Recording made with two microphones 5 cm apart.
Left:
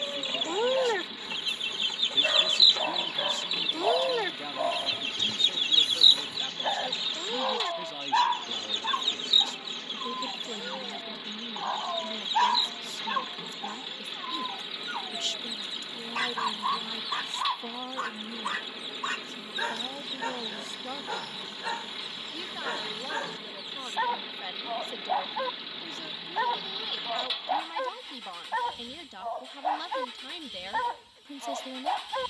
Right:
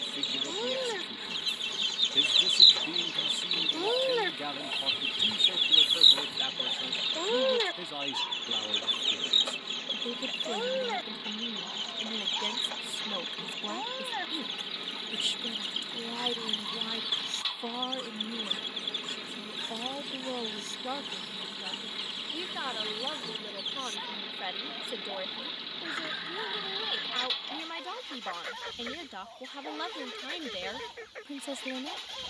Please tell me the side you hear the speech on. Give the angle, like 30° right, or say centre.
10° right.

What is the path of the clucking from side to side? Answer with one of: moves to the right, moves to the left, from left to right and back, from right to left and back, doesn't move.
moves to the right.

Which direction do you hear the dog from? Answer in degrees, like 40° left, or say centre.
60° left.